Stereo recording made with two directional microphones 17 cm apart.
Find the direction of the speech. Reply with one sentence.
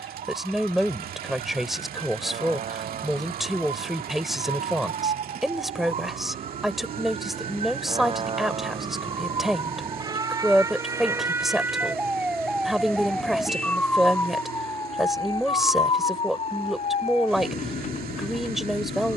You can hear the speech in the centre.